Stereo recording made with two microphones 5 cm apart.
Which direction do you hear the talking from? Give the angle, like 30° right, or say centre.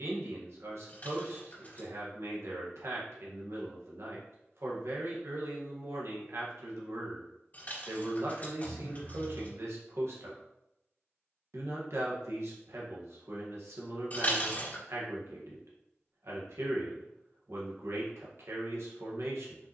70° right.